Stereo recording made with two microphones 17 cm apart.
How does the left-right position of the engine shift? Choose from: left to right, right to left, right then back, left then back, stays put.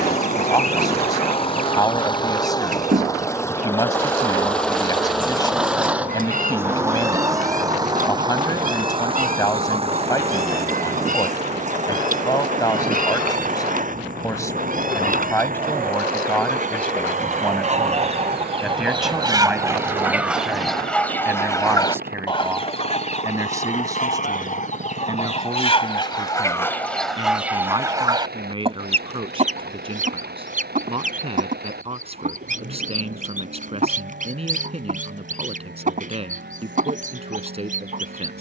left to right.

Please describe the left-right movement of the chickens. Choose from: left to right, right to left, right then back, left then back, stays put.
left then back.